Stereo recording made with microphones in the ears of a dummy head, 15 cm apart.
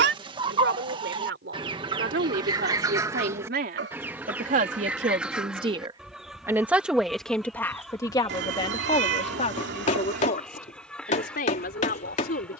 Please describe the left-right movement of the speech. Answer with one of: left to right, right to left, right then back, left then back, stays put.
right to left.